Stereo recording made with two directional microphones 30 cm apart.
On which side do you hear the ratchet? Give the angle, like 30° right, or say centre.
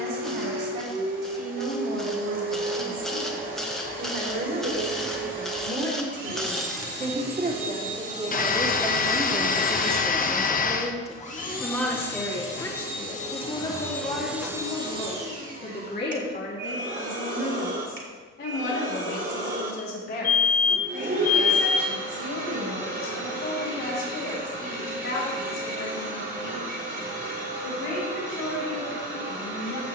centre.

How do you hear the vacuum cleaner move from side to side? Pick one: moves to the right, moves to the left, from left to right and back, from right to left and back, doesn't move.
from right to left and back.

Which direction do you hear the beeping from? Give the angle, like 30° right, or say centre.
30° left.